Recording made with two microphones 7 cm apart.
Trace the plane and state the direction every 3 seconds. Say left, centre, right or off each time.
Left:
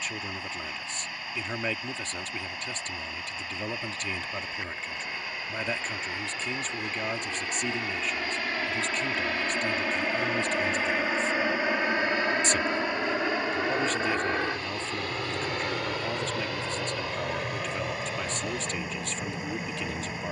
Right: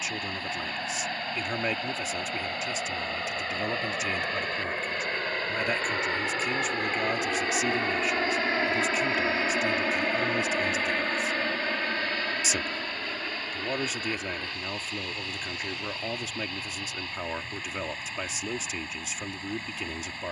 right, right, right, centre, left, left, left.